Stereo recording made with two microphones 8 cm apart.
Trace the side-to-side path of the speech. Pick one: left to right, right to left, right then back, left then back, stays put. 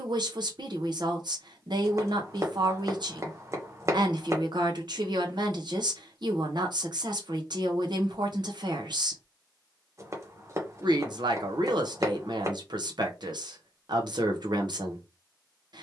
stays put.